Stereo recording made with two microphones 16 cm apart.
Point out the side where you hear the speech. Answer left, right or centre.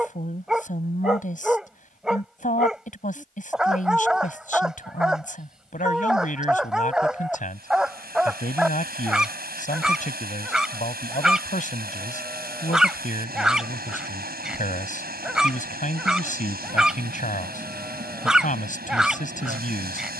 left.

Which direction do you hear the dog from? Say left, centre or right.
centre.